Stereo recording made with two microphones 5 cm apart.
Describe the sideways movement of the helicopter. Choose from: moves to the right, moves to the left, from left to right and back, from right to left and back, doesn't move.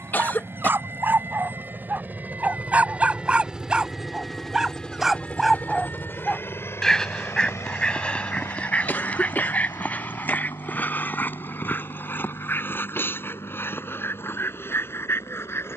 moves to the left.